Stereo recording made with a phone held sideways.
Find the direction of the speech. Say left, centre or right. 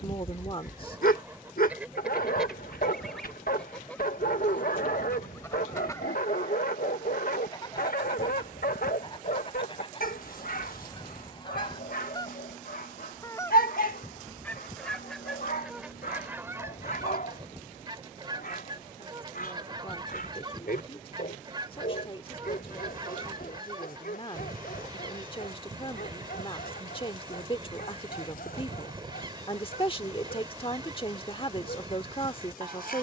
left.